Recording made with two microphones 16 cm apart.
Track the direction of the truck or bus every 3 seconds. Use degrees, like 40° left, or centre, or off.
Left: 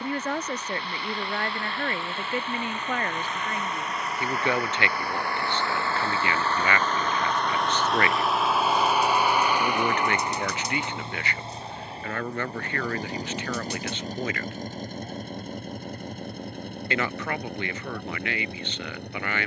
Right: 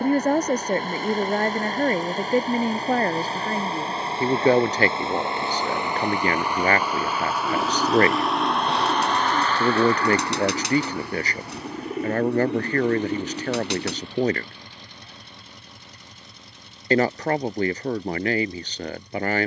40° right, 30° right, centre, 20° left, 40° left, 50° left, 60° left.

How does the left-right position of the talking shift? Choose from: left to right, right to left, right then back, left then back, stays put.
stays put.